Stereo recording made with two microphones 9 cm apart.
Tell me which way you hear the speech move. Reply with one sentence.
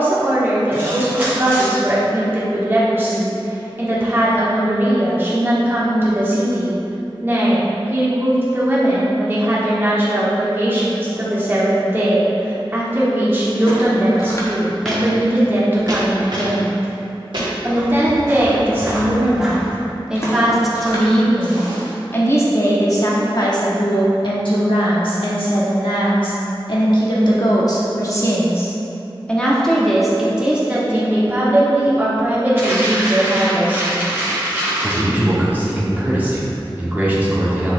In this clip you hear the speech move from right to left and back again.